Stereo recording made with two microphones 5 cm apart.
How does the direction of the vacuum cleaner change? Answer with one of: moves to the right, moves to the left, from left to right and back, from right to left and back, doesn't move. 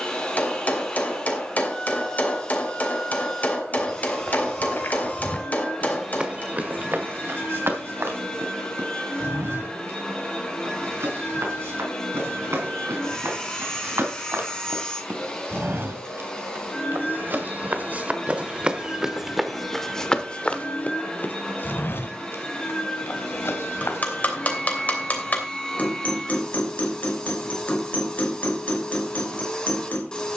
doesn't move.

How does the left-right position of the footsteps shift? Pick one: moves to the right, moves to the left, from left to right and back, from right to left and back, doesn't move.
from left to right and back.